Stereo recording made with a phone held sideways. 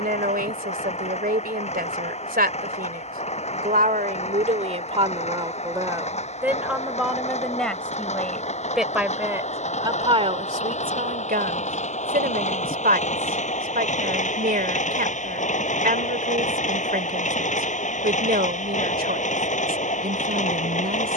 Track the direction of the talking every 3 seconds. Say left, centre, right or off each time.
right, right, centre, right, right, right, right.